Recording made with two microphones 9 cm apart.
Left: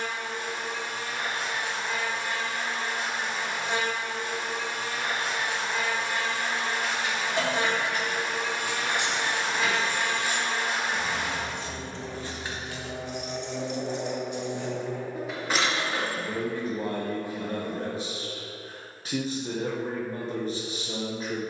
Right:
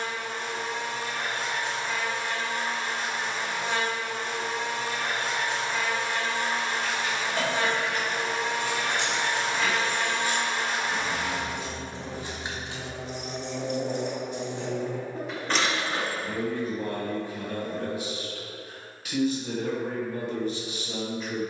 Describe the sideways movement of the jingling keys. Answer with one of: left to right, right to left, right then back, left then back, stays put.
right then back.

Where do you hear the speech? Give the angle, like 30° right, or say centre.
30° left.